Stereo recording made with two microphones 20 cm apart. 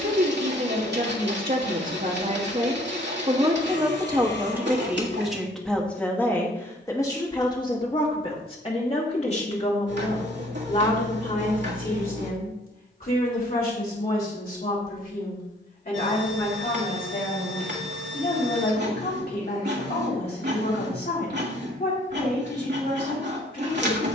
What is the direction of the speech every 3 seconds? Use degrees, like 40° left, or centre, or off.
50° right, 10° right, 20° left, 40° left, 50° left, 50° left, 60° left, 60° left.